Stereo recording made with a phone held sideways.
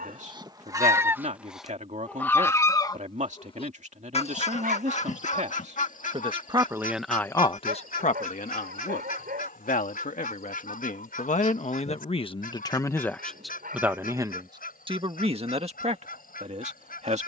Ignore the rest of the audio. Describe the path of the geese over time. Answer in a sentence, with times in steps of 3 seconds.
You can hear the geese in the centre from 0 s and on the left from 3 s.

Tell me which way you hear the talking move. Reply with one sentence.
You can hear the talking move from right to left and back again.